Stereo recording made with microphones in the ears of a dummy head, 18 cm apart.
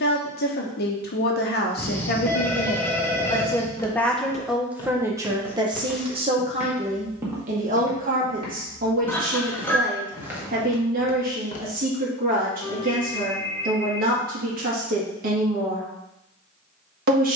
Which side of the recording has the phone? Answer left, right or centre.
centre.